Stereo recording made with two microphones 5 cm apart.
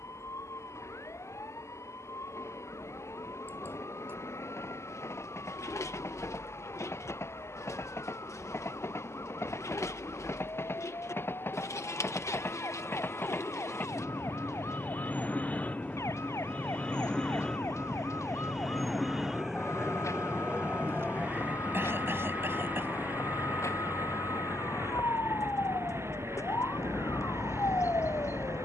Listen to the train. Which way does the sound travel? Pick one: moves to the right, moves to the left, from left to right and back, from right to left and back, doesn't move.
moves to the right.